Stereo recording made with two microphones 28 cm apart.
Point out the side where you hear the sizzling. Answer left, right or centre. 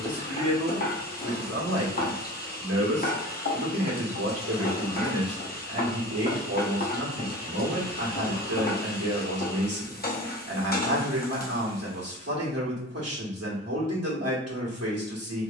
left.